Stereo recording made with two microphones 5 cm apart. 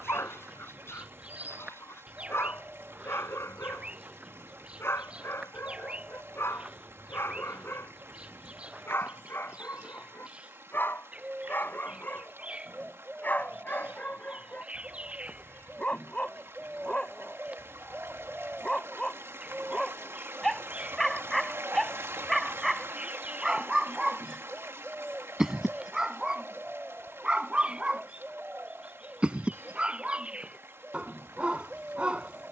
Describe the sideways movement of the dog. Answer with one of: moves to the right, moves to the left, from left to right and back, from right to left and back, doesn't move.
moves to the right.